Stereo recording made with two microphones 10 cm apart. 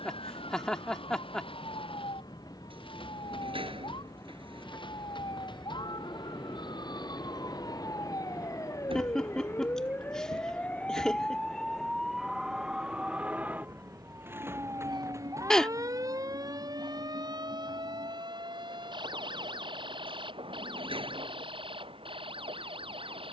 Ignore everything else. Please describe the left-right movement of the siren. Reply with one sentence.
In this clip you hear the siren move from left to right.